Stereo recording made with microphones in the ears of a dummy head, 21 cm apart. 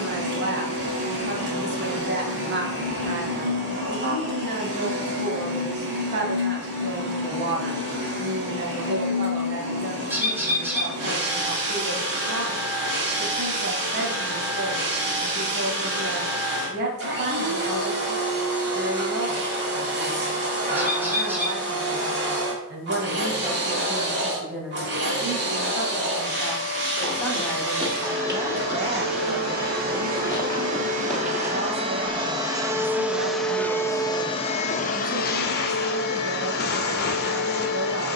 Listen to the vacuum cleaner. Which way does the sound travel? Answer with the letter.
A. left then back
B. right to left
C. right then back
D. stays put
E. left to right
B.